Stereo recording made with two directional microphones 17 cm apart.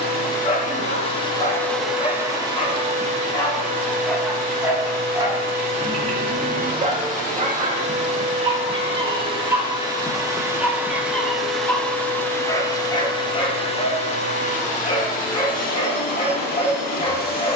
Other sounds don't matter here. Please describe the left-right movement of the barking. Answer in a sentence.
You can hear the barking go right and come back.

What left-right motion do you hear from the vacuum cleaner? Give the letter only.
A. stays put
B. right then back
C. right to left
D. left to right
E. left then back
B.